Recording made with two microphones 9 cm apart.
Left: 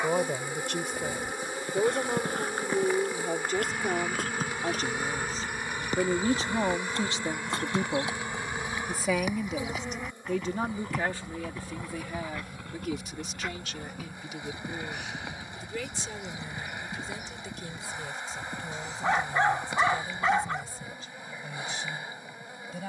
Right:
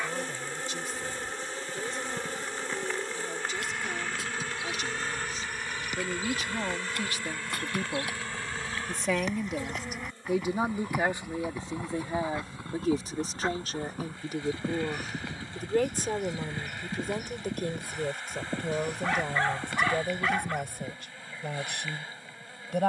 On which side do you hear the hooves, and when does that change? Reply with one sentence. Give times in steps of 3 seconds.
In this clip you hear the hooves on the left from 0 s, in the centre from 9 s, on the right from 12 s and not at all from 21 s.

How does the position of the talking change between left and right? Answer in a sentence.
You can hear the talking go from the left side to the right.